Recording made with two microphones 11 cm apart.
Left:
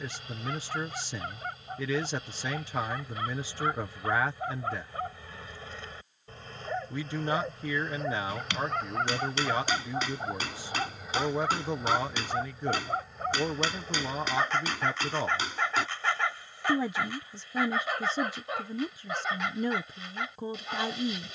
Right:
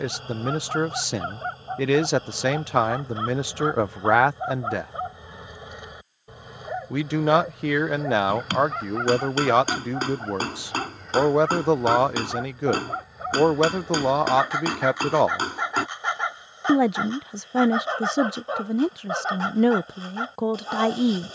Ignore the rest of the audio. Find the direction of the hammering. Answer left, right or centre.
right.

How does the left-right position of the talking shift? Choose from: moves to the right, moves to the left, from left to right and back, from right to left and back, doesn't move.
doesn't move.